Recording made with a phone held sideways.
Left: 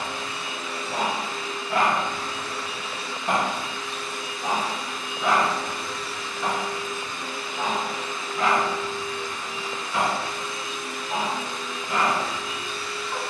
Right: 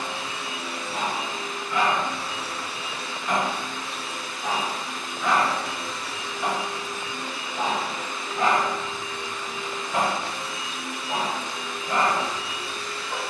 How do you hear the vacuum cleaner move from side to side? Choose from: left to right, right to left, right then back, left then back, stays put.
stays put.